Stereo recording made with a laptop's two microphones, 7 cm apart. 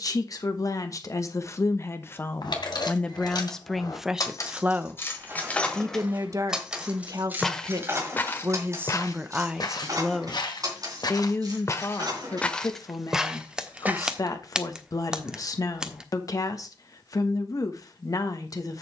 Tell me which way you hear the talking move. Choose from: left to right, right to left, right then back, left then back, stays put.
right then back.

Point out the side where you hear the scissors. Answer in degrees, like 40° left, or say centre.
10° right.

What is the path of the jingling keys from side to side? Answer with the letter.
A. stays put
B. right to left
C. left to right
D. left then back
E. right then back
C.